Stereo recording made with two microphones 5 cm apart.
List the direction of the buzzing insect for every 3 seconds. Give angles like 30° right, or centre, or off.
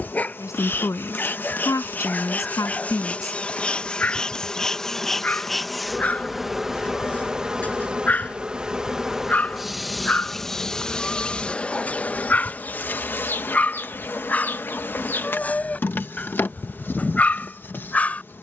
40° left, 10° left, 10° right, 10° left, 40° left, 40° left.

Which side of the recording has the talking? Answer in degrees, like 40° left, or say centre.
80° left.